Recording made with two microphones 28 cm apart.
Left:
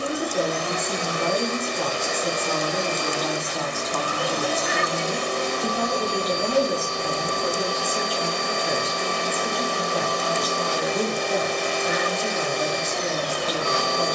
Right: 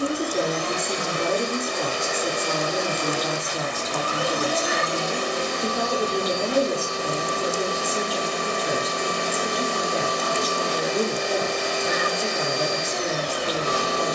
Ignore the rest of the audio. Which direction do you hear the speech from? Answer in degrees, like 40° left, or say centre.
30° right.